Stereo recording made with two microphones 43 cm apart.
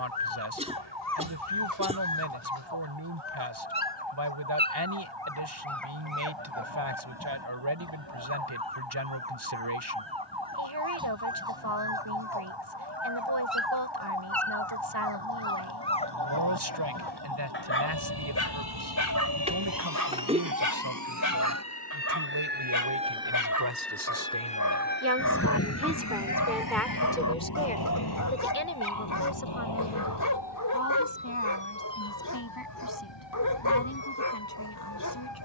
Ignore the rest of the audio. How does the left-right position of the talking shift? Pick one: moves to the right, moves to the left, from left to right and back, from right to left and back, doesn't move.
moves to the left.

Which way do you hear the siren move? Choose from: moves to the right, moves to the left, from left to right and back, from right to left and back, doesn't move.
moves to the left.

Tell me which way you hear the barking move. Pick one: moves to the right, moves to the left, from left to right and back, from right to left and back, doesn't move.
from left to right and back.